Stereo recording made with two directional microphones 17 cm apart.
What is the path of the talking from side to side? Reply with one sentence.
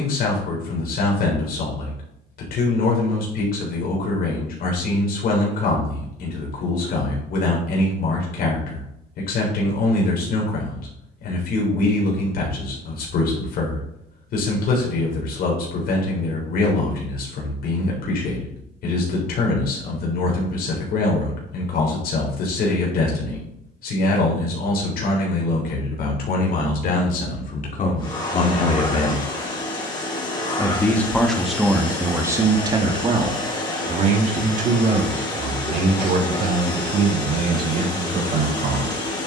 In this clip you hear the talking move to the right.